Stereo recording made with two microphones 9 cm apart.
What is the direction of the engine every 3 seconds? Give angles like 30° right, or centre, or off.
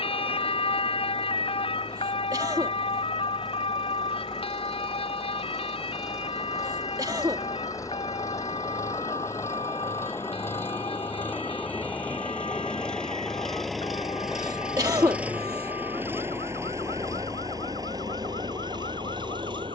50° left, 40° left, 40° left, 20° left, centre, 30° right, 50° right.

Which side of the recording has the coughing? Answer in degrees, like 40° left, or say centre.
40° right.